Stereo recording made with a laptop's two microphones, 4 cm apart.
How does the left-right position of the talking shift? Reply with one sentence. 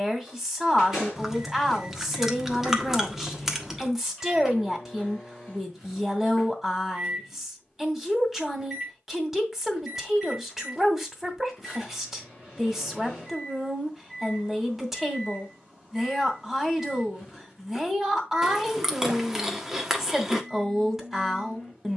In this clip you hear the talking stay in one place.